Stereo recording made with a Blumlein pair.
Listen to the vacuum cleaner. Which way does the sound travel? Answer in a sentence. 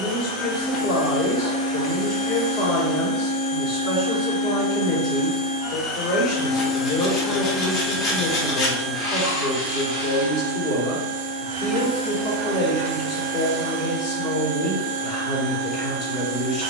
In this clip you hear the vacuum cleaner move to the right.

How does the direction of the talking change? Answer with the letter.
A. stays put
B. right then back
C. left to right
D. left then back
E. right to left
A.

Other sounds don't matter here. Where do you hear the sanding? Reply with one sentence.
In this clip you hear the sanding on the left.